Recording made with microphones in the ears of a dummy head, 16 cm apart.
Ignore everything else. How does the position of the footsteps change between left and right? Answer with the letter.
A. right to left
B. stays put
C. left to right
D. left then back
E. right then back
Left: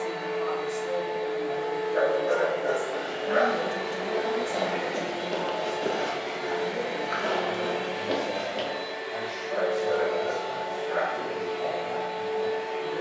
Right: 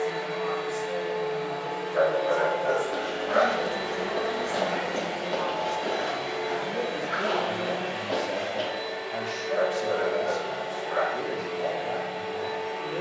A.